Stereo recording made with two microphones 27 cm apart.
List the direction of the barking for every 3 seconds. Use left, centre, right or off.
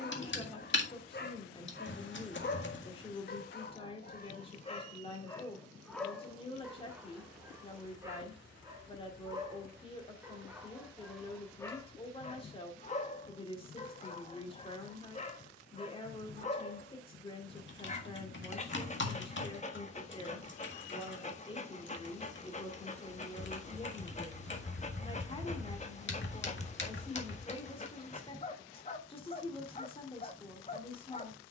left, left, centre, centre, left, left, left, left, left, left, left.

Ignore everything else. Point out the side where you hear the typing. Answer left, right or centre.
left.